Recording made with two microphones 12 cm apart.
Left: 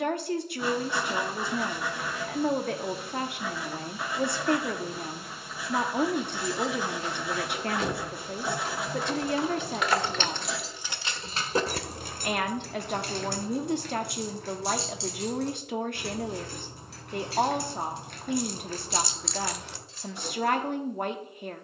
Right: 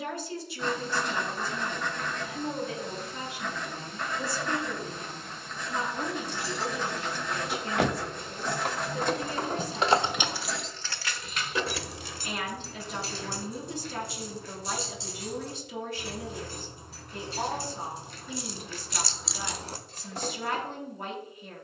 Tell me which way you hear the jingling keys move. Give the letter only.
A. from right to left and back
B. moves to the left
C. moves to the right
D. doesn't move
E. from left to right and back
A.